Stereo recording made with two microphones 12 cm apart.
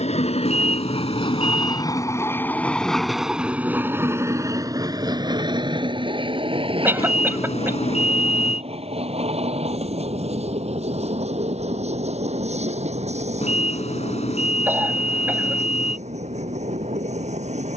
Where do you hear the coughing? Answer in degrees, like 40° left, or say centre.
20° right.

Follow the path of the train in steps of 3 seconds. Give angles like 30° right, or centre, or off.
40° left, 20° right, 50° right, 60° right, 60° right, 60° right.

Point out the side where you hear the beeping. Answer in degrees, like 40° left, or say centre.
60° left.